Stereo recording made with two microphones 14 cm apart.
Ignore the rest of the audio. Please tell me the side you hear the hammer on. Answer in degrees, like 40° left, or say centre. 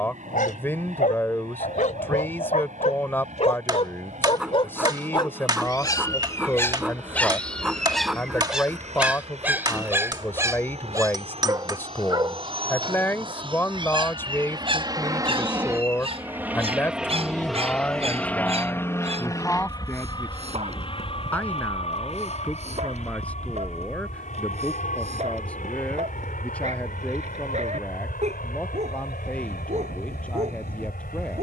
30° right.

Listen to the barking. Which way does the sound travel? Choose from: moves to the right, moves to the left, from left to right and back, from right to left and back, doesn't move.
moves to the right.